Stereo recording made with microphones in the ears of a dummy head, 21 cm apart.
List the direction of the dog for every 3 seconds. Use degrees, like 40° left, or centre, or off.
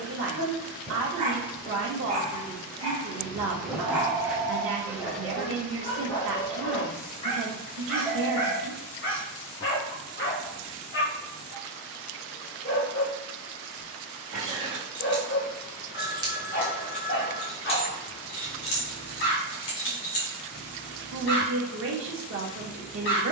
30° right, centre, 30° left, 40° left, 40° left, 40° left, 40° left, 40° left.